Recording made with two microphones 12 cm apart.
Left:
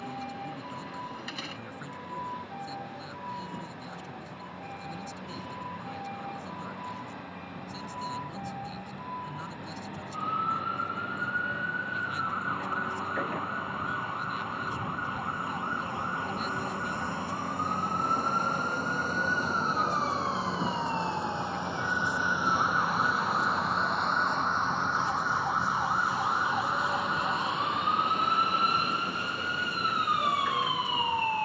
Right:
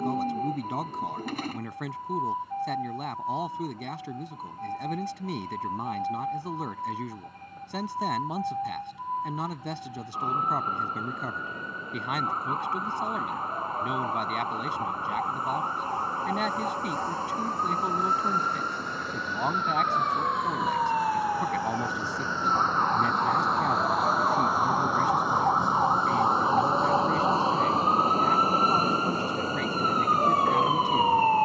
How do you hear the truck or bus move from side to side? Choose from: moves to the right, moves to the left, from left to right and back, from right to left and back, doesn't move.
moves to the right.